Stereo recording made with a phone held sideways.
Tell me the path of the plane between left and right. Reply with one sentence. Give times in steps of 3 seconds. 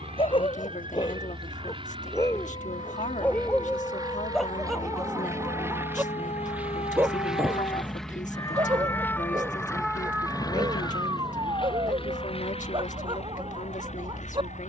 In this clip you hear the plane on the right from 0 s, in the centre from 6 s and on the left from 9 s.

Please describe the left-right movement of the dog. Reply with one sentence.
In this clip you hear the dog go from the left side to the right.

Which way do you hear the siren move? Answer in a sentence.
In this clip you hear the siren move to the right.